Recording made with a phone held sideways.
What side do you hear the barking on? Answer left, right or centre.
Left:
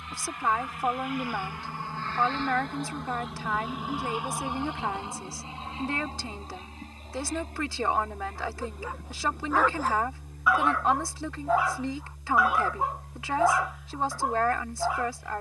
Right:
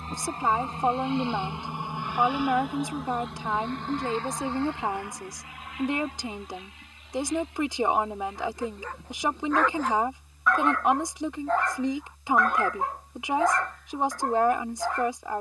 centre.